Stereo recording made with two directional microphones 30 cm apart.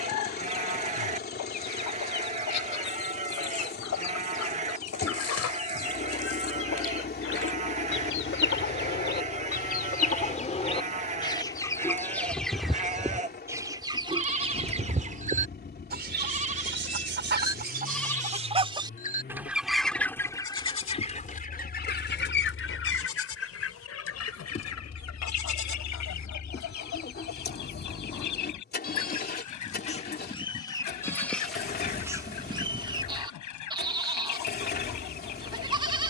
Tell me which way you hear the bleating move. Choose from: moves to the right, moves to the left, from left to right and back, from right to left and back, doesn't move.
from right to left and back.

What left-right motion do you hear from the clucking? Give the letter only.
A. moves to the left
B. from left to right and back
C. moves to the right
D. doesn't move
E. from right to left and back
B.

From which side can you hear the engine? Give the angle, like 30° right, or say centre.
30° left.